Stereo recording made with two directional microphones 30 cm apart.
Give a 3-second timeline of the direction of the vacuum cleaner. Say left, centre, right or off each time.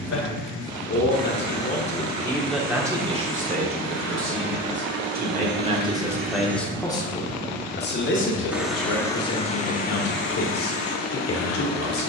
right, right, right, left.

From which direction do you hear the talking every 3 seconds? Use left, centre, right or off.
left, right, left, left.